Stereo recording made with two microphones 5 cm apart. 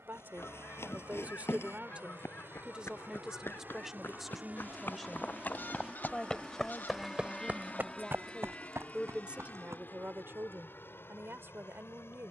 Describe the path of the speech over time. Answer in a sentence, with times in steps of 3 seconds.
In this clip you hear the speech on the right from 0 s, in the centre from 3 s and on the right from 9 s.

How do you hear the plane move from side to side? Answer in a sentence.
In this clip you hear the plane go from the right side to the left.